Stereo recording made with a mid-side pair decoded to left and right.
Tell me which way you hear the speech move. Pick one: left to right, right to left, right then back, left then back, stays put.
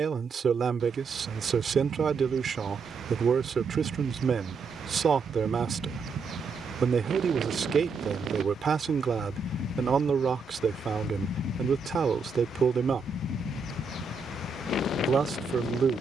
stays put.